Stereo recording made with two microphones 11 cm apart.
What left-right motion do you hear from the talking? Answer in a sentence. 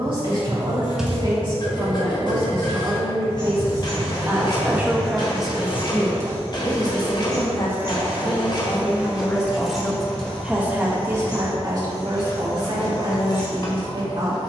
You can hear the talking go left and come back.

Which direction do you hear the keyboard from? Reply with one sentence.
In this clip you hear the keyboard in the centre.